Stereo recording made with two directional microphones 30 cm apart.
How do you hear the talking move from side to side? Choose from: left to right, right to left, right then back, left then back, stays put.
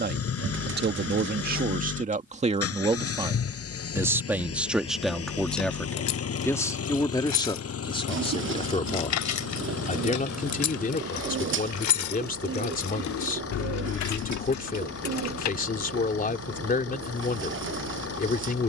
right to left.